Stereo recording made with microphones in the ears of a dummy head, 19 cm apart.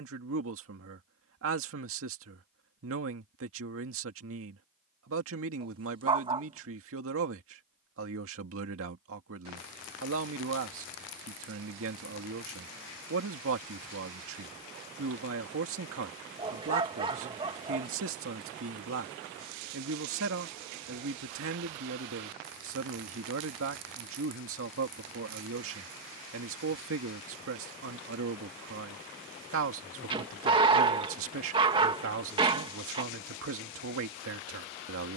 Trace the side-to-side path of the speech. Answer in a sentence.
You can hear the speech stay in one place.